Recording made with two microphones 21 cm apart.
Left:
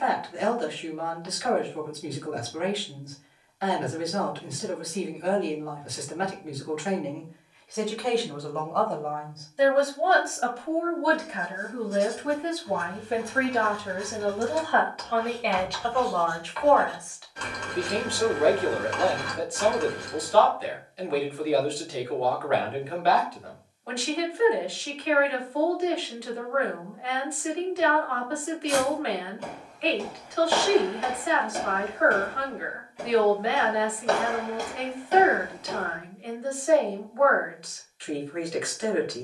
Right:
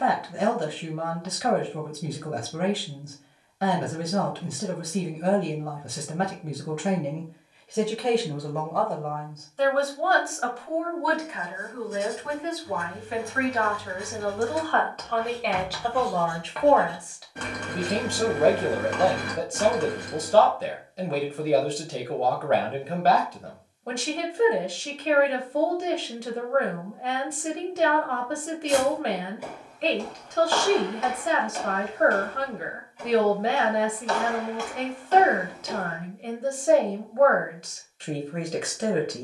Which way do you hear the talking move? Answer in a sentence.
In this clip you hear the talking go left and come back.